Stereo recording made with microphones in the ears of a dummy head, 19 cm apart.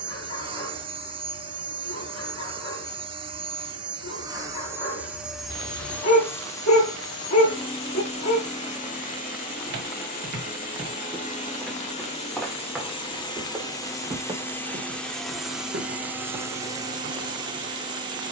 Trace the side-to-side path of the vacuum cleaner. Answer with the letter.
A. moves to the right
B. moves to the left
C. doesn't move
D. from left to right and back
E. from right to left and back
E.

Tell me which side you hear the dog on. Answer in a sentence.
You can hear the dog on the left.